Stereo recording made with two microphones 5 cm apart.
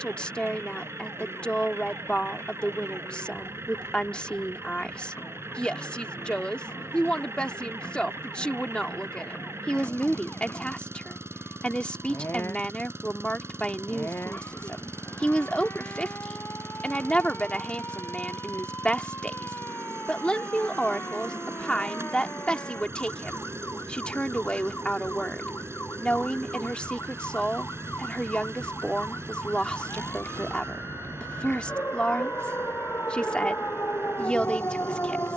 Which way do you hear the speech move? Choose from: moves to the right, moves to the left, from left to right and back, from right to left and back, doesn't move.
doesn't move.